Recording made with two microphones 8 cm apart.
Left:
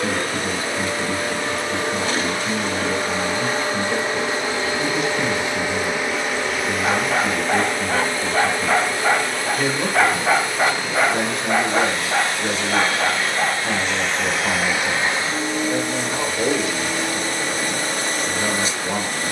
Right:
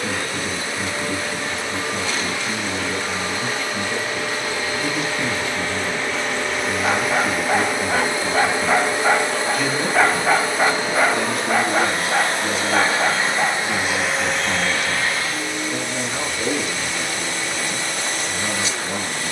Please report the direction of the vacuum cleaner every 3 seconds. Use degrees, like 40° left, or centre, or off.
50° left, 30° left, 10° right, 30° right, 20° right, 40° left, 40° left.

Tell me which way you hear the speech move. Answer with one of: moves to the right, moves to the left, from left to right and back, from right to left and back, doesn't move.
doesn't move.